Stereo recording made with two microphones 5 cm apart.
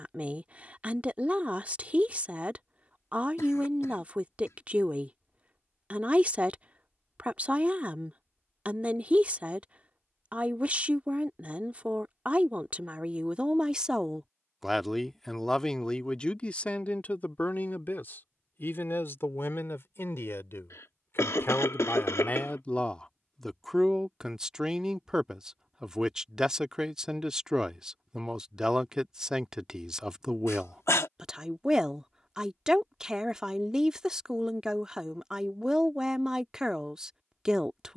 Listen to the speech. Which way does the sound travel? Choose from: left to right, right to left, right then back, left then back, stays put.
left then back.